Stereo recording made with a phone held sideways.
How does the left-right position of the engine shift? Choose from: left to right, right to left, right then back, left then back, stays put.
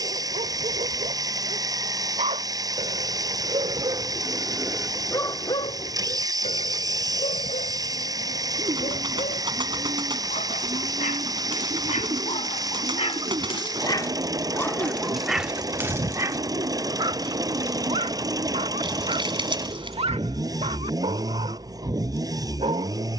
stays put.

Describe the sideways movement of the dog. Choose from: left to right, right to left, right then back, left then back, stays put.
left then back.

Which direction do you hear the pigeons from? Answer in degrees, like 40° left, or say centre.
40° right.